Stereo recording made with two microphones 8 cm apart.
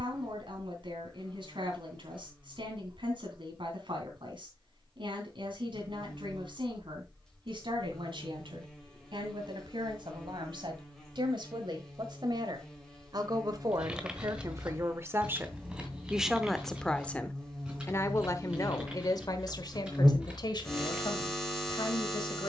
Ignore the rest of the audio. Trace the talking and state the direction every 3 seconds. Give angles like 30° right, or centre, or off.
70° right, 70° right, 70° right, 70° right, 50° right, centre, 50° left, 60° left.